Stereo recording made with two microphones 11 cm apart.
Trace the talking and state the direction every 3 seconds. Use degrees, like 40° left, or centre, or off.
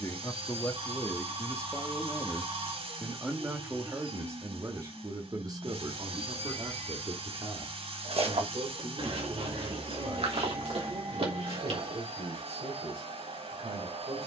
10° left, 30° right, 50° right, 60° right, 70° right.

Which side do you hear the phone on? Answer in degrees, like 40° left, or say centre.
50° right.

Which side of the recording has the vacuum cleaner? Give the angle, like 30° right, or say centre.
70° right.